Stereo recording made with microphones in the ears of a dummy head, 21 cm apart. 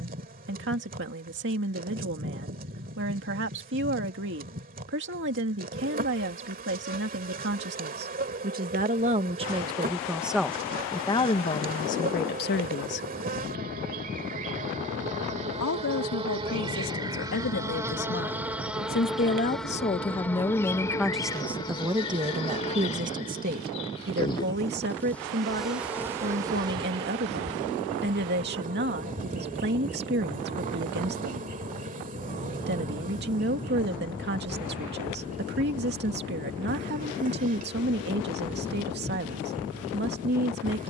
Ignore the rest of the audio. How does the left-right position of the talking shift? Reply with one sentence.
In this clip you hear the talking move from right to left and back again.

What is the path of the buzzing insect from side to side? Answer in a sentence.
You can hear the buzzing insect move from right to left and back again.